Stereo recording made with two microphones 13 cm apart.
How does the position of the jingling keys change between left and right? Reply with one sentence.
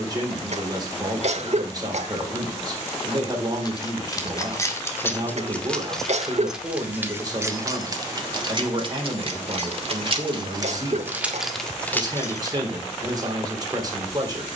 In this clip you hear the jingling keys move from left to right and back again.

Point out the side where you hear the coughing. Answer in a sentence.
You can hear the coughing on the right.